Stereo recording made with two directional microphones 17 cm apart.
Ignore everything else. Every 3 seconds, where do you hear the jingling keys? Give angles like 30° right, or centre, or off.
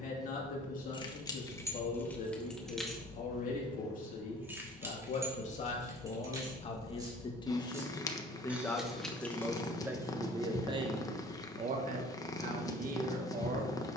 10° left, 10° right, 10° right, 10° left, off.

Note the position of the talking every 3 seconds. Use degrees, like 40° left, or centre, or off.
50° left, 50° left, 20° left, 20° right, 50° right.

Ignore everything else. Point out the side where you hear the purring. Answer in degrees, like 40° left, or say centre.
20° left.